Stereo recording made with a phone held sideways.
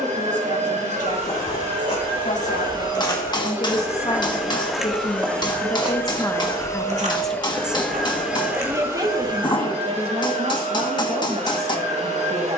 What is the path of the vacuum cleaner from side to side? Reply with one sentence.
In this clip you hear the vacuum cleaner go left and come back.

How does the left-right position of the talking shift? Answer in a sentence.
In this clip you hear the talking travel towards the right.